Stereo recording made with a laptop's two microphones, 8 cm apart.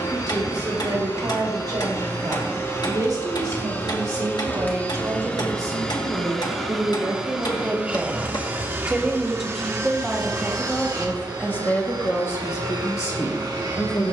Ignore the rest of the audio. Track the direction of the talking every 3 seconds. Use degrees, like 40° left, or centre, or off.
60° right, 50° right, 30° right, 10° left, 40° left.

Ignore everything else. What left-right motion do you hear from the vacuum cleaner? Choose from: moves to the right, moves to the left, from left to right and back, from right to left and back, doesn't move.
moves to the right.